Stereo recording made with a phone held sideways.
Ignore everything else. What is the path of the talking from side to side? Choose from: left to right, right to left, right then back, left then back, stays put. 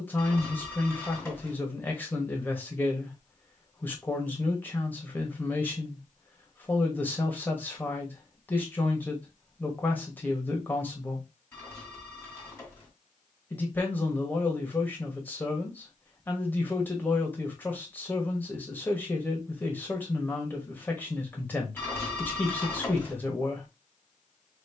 stays put.